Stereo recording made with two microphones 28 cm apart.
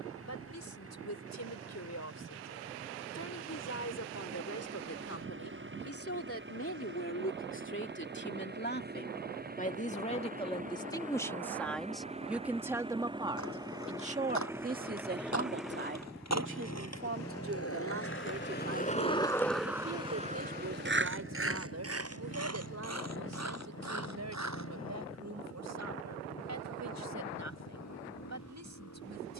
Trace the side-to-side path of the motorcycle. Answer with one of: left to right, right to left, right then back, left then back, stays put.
right to left.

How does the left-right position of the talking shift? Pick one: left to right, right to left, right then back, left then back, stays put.
left to right.